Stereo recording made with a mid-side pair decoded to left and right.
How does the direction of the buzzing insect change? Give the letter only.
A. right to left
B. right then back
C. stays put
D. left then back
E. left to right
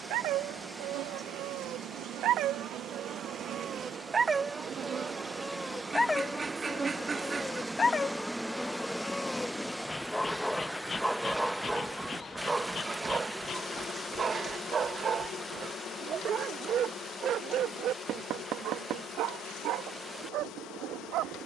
A.